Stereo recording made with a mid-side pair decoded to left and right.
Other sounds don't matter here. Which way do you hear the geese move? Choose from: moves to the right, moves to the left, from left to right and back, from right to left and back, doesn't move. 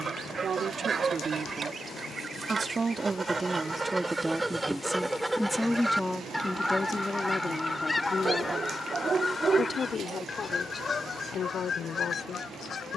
moves to the left.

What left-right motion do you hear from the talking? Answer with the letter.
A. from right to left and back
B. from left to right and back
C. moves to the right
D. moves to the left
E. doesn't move
D.